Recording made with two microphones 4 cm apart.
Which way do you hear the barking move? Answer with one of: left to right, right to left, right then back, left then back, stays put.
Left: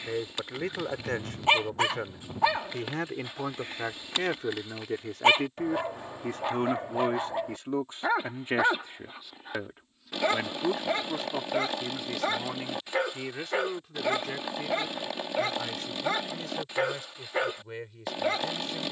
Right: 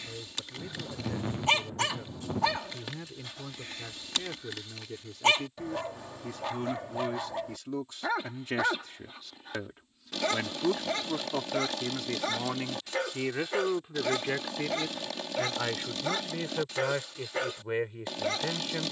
stays put.